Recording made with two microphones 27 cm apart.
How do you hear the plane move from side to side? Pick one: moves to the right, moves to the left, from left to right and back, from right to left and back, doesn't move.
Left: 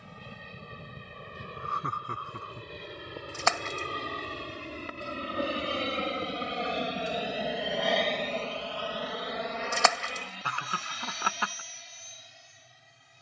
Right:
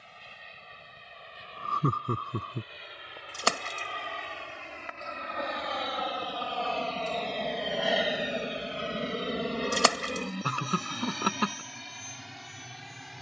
moves to the right.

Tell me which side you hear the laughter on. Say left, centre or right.
right.